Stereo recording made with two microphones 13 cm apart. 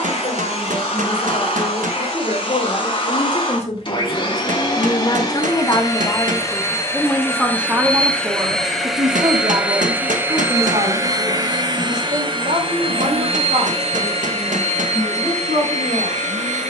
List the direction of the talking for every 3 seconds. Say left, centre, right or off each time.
left, left, centre, right, right, right.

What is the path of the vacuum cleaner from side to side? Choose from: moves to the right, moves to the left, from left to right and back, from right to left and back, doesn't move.
moves to the right.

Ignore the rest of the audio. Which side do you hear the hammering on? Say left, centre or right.
right.